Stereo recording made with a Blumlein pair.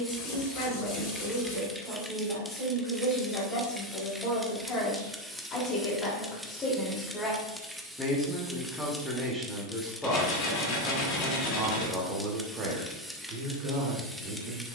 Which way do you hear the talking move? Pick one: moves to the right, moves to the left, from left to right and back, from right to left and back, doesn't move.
moves to the right.